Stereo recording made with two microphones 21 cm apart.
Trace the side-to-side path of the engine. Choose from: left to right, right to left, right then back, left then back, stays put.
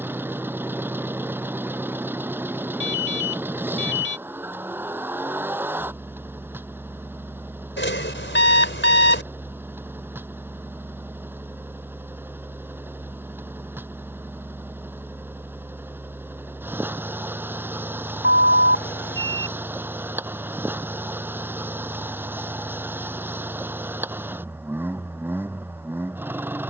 stays put.